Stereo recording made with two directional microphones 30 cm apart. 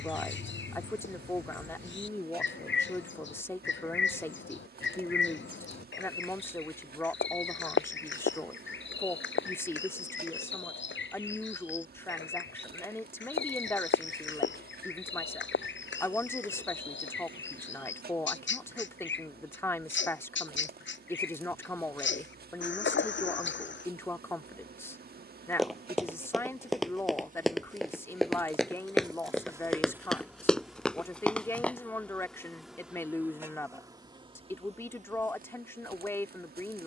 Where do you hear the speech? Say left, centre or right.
centre.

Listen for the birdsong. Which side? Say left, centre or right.
left.